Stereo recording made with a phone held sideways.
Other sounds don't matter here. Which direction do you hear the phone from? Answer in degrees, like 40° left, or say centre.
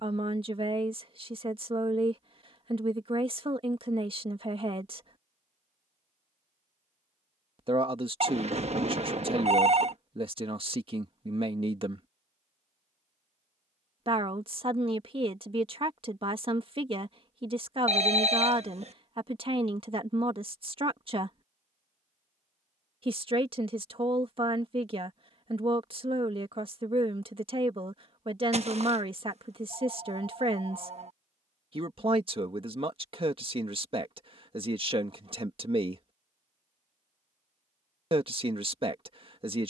50° right.